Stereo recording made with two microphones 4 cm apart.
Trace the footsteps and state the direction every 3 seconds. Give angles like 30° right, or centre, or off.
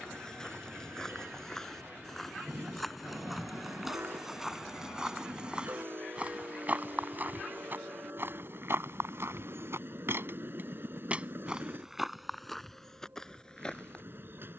10° left, 10° right, 40° right, 40° right, 10° left.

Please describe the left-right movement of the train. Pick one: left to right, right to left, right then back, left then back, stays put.
stays put.